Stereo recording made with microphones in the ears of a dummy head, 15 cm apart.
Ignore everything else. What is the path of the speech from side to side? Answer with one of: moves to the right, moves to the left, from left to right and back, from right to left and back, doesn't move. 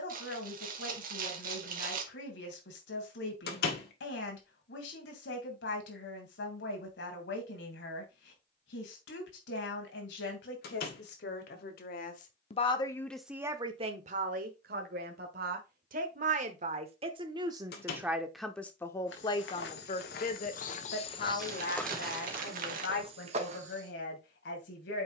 from left to right and back.